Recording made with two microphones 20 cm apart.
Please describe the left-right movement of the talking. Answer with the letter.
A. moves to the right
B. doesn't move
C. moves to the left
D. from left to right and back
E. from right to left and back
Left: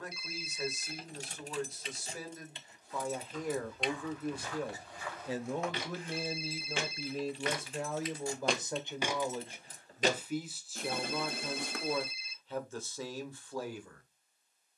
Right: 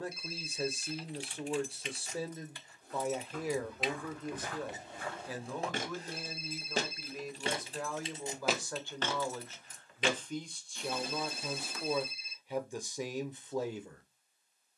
E.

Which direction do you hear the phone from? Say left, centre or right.
right.